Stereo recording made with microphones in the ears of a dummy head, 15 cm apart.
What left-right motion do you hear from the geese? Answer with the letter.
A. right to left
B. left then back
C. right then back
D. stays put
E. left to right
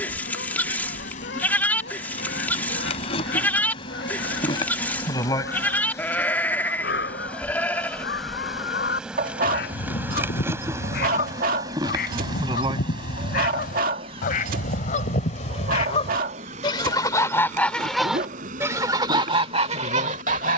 E.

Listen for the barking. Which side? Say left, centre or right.
right.